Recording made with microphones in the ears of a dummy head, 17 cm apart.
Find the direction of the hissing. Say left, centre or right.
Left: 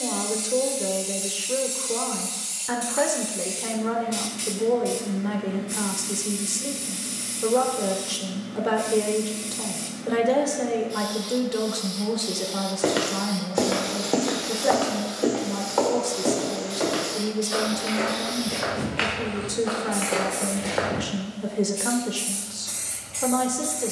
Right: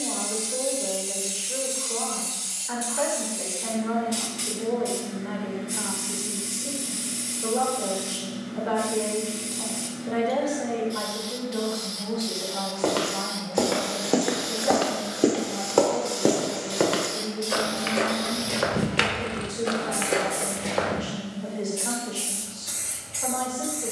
centre.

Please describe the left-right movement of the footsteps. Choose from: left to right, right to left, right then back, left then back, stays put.
right then back.